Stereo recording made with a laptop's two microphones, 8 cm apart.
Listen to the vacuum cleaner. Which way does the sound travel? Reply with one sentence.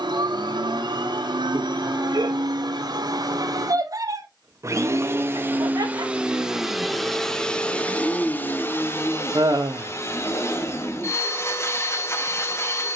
In this clip you hear the vacuum cleaner move to the left.